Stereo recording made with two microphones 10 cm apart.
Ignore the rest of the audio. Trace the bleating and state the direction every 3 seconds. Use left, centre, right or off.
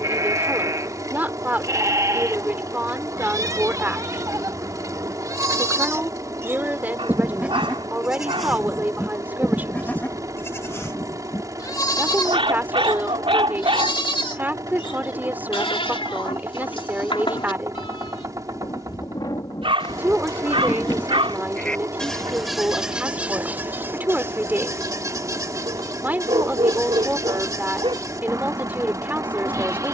right, right, centre, left, left, left, left, centre, right, right.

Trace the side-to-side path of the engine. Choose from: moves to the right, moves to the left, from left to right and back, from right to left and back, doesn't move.
doesn't move.